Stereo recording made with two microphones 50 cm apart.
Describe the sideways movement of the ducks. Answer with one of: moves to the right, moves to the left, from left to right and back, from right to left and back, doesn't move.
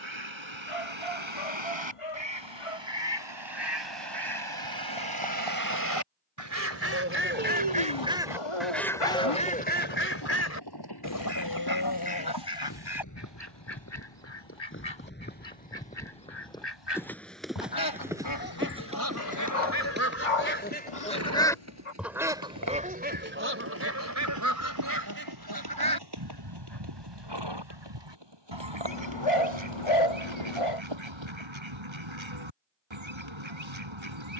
from right to left and back.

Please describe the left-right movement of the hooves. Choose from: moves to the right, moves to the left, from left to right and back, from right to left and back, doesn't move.
moves to the right.